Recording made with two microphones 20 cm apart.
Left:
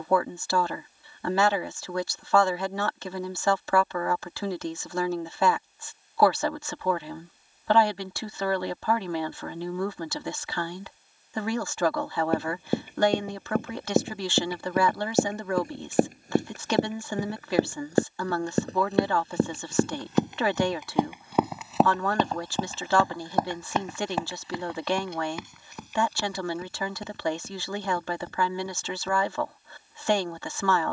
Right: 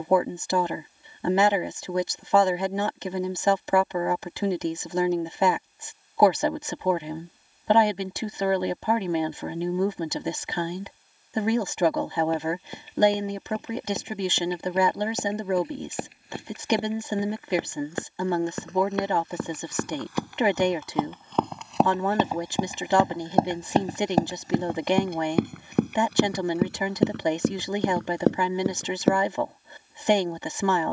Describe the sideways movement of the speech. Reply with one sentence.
You can hear the speech stay put.